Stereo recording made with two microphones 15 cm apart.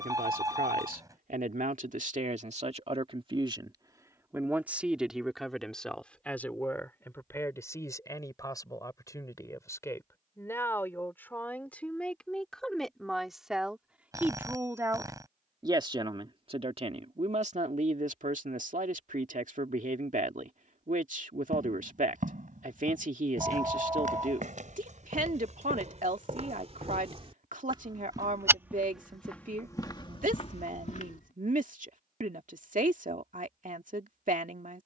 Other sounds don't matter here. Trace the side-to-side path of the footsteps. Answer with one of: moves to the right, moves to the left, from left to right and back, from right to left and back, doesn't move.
moves to the left.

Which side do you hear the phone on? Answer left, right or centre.
right.